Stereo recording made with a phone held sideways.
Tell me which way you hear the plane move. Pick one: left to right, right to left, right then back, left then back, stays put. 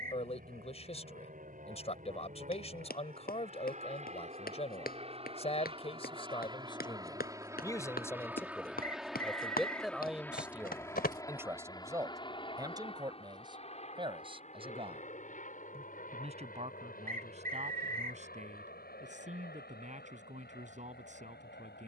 right to left.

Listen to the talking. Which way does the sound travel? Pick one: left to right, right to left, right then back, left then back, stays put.
left to right.